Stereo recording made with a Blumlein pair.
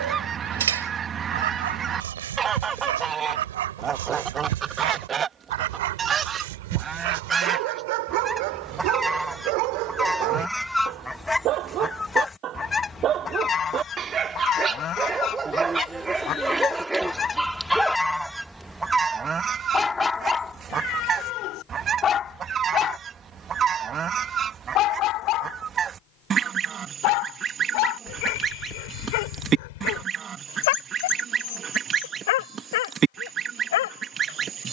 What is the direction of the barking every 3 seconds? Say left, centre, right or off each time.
right, right, right, right, right, centre, centre, left, left, left, left, left.